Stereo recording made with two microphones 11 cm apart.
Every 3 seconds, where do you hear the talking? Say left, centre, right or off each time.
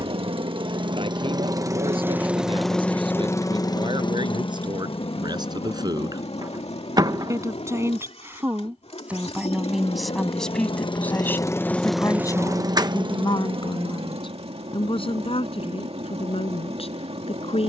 right, right, right, centre, left, left.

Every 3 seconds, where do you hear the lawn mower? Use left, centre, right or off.
right, left, left, left, right, right.